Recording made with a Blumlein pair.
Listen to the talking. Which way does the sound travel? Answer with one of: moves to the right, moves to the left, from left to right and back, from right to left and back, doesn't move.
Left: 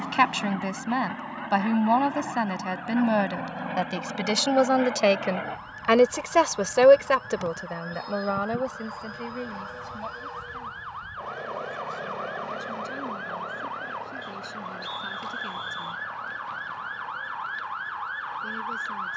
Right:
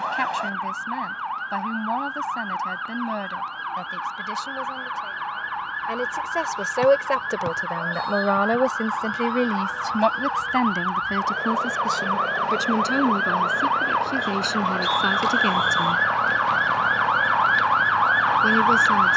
moves to the right.